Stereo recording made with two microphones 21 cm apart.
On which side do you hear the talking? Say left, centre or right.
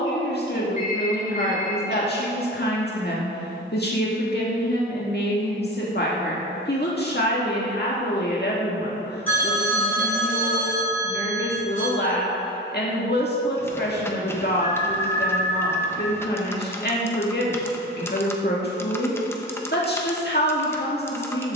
left.